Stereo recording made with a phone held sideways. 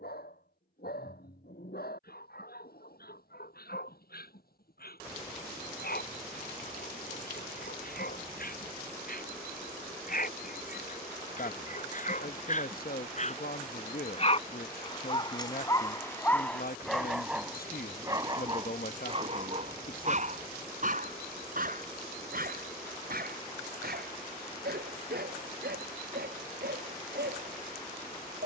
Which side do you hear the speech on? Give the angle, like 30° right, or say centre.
60° left.